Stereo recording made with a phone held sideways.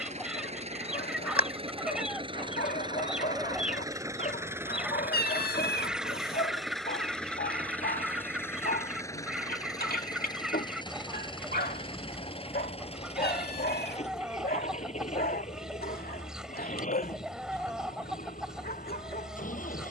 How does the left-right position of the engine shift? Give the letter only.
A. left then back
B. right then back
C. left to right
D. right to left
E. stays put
D.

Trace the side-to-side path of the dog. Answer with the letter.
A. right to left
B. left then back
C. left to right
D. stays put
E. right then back
D.